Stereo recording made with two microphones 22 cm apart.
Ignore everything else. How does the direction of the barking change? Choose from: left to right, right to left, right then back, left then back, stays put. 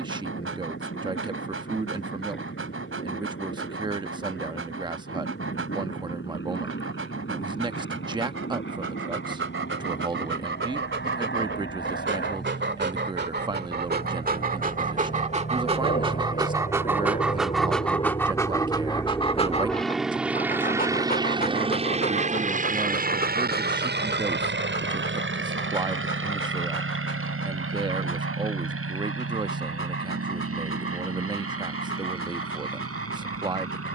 right to left.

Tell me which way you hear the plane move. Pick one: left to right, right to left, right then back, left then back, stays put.
left to right.